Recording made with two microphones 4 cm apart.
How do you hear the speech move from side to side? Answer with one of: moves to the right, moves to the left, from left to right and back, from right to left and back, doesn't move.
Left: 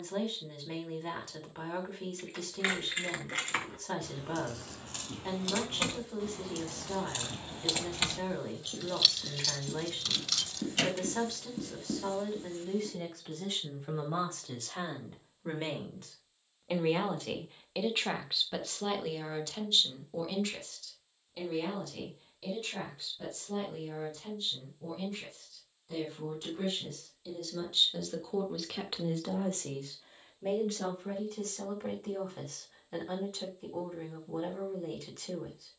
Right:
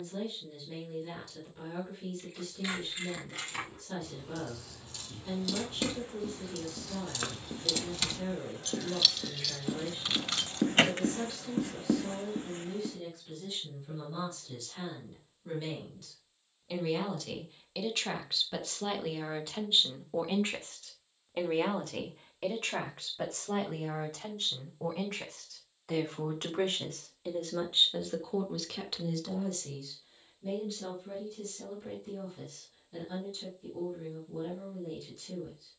from left to right and back.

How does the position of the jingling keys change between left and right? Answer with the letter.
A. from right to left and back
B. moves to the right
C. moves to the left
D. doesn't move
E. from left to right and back
B.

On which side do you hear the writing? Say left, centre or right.
right.